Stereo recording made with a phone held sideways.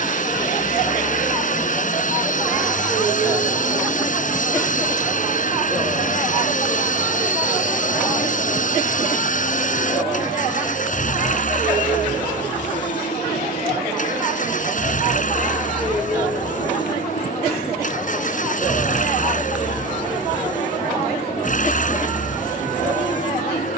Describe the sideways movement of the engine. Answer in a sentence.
In this clip you hear the engine stay put.